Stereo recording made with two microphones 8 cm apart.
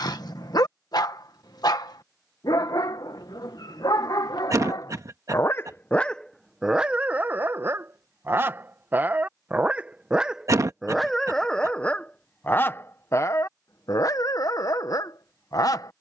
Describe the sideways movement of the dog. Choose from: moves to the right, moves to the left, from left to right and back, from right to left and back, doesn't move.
from left to right and back.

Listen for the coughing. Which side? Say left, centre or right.
right.